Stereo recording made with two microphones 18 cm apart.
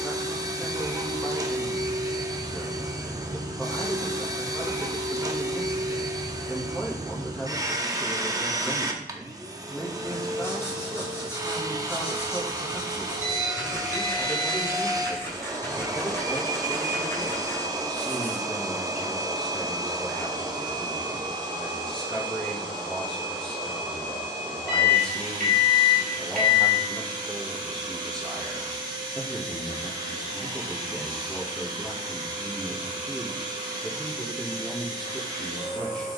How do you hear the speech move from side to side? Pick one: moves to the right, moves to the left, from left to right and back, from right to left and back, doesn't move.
doesn't move.